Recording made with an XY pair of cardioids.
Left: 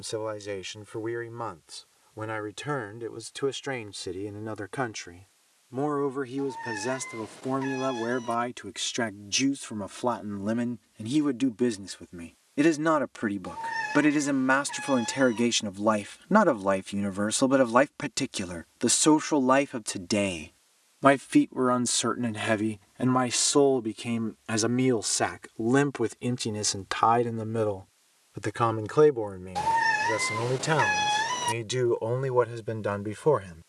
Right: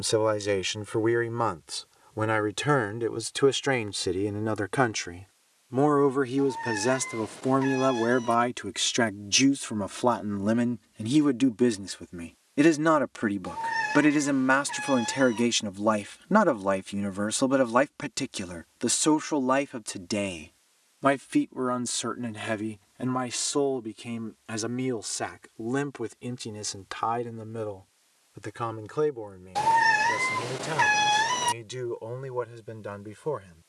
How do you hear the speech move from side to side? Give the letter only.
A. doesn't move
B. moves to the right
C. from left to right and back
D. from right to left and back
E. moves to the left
E.